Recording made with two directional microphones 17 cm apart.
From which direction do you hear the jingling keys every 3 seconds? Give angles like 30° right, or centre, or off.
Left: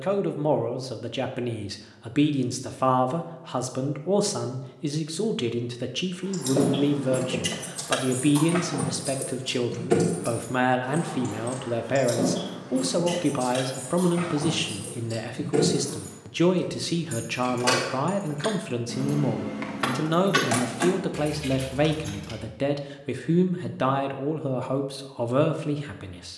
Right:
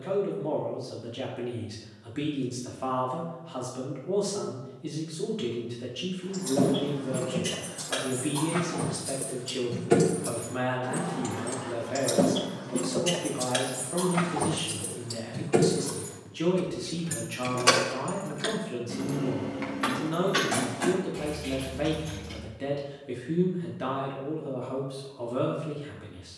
off, off, 50° left, 10° right, 40° right, 30° right, 20° left, 60° left, off.